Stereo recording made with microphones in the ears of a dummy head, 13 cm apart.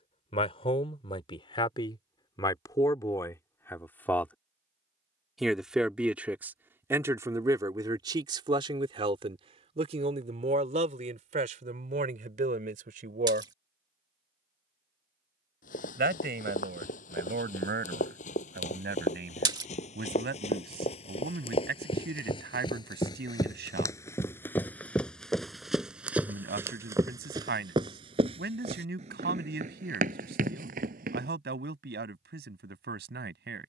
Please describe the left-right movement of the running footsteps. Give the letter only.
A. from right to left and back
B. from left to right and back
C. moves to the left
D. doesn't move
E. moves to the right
E.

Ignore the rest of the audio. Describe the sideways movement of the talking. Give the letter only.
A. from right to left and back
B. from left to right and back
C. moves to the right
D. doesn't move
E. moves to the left
C.